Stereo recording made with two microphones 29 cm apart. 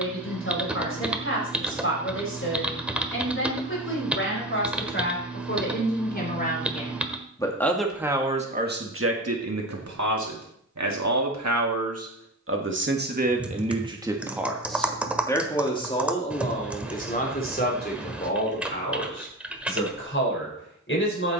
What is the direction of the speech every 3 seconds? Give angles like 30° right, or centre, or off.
50° left, 40° left, centre, 70° right, 20° right, 20° left, 40° left.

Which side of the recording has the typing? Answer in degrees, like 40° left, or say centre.
centre.